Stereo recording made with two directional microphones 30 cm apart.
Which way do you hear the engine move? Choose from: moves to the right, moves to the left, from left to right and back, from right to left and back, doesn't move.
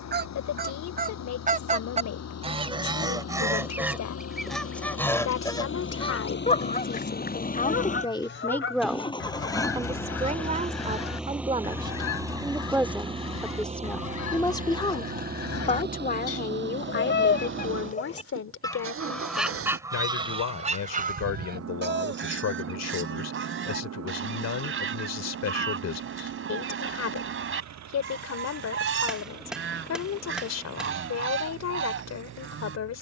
moves to the right.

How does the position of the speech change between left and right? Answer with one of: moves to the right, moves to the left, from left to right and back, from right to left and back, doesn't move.
from left to right and back.